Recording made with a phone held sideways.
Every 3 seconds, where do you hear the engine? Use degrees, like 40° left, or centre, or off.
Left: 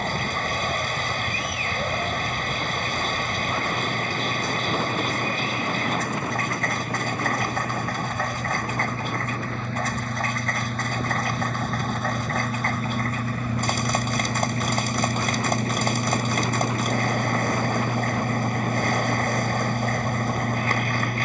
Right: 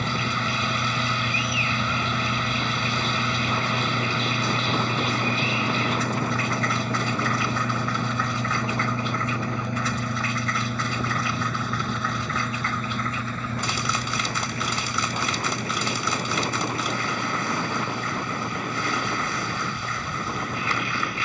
50° right, 40° right, 30° right, 10° right, 10° left, 40° left, 50° left.